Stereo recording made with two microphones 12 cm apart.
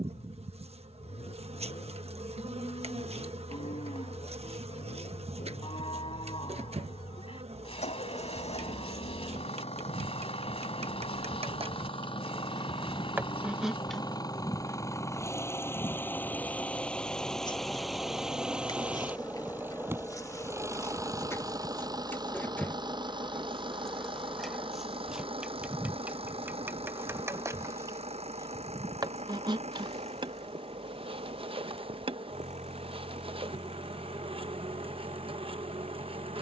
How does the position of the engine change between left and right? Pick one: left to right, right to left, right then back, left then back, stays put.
left to right.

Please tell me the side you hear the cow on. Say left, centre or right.
left.